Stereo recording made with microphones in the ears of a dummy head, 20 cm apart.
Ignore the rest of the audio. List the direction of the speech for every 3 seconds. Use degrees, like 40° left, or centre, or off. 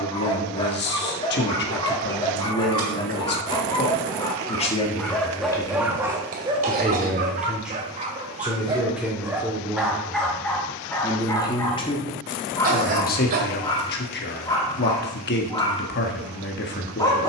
50° left, 30° left, centre, 10° left, 40° left, 50° left.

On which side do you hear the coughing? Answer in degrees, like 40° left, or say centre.
40° right.